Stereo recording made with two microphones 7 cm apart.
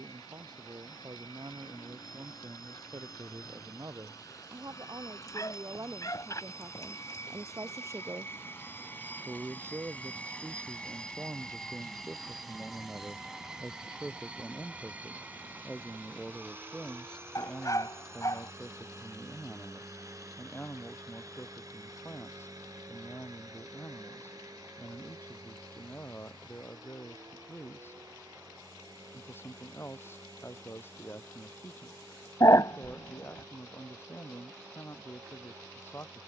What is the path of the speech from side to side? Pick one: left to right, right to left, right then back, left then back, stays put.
right to left.